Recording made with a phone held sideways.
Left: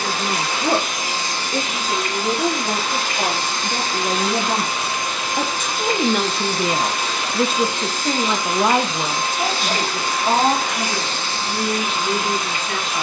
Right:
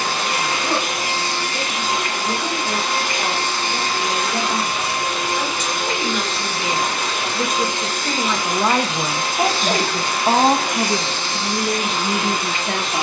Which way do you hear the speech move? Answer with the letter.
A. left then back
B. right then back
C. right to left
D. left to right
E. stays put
D.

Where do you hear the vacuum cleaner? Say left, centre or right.
right.